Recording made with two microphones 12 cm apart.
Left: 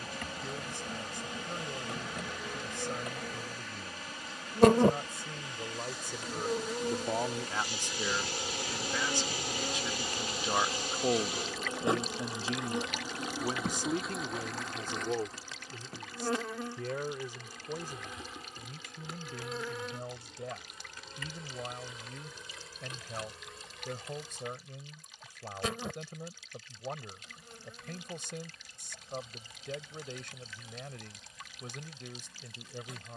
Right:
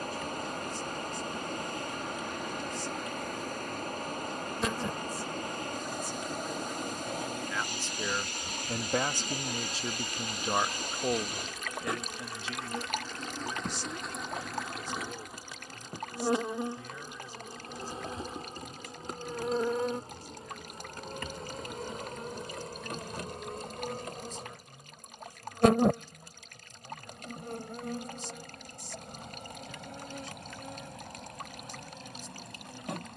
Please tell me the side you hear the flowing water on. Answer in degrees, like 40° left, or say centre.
50° right.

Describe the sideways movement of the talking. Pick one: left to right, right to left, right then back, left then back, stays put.
right then back.